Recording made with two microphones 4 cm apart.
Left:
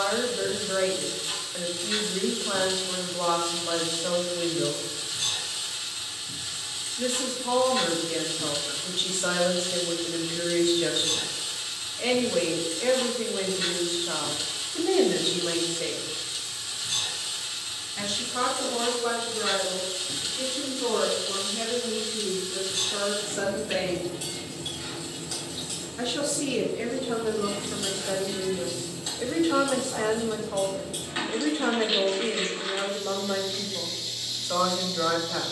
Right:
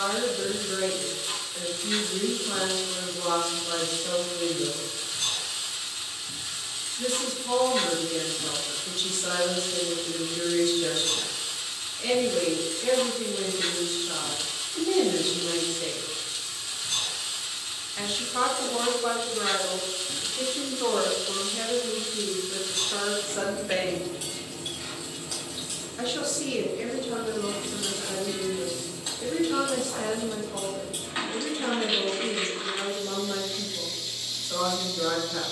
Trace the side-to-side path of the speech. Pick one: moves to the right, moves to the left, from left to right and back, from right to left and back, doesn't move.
from left to right and back.